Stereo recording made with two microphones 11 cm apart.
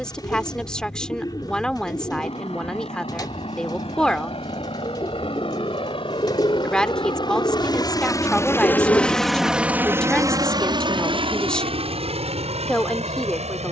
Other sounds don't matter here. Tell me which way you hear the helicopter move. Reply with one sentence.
In this clip you hear the helicopter move from left to right.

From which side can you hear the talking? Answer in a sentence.
In this clip you hear the talking in the centre.